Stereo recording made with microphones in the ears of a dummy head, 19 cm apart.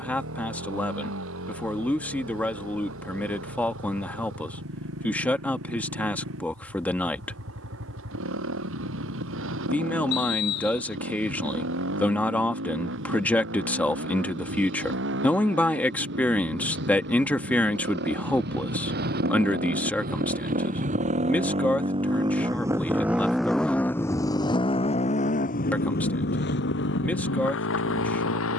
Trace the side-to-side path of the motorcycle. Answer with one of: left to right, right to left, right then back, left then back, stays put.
right to left.